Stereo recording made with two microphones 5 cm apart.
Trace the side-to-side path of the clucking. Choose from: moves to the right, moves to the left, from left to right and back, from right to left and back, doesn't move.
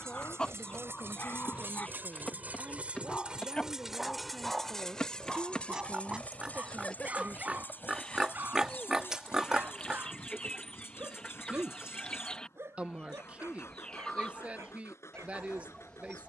doesn't move.